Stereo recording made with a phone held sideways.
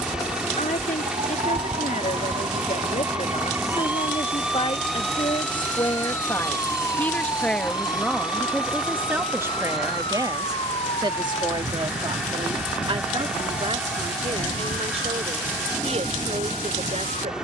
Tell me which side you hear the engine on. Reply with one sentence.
You can hear the engine in the centre.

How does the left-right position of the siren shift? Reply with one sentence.
You can hear the siren go from the right side to the left.